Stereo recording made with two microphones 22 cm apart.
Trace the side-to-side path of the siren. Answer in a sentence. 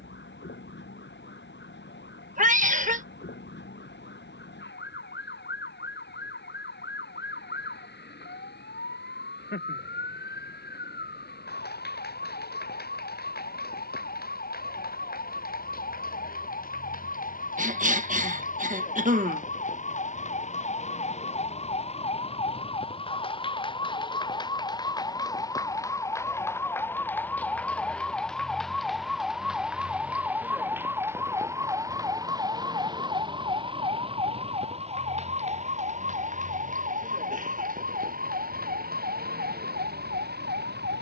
You can hear the siren move from left to right.